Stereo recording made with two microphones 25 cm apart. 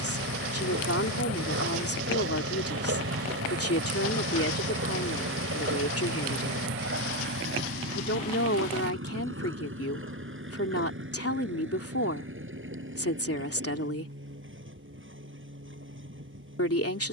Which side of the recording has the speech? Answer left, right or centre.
left.